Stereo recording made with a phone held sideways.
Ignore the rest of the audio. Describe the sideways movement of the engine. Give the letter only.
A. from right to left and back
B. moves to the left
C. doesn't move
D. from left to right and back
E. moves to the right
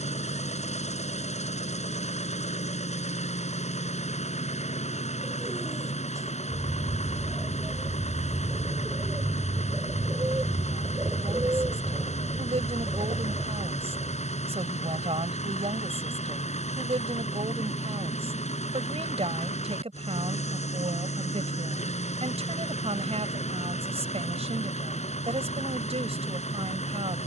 C.